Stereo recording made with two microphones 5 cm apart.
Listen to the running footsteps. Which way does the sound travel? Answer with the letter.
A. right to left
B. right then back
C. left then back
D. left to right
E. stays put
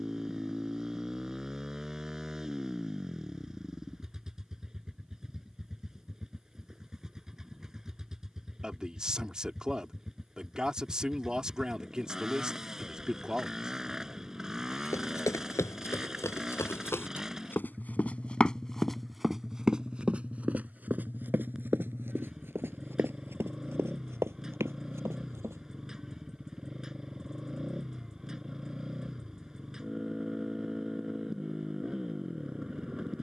D.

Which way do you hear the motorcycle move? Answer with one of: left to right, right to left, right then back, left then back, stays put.
stays put.